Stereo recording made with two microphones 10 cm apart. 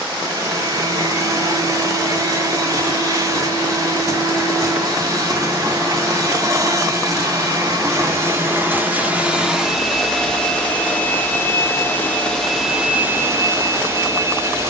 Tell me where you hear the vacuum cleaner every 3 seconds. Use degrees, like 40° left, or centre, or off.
40° right, 40° right, 30° right, 10° left, 20° right.